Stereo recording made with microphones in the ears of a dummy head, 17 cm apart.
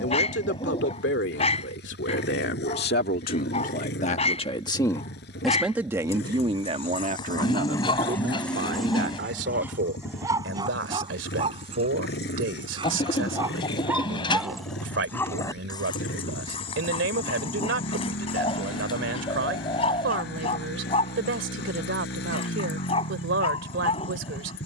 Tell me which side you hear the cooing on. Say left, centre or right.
left.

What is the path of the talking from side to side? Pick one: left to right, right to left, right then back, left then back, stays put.
left to right.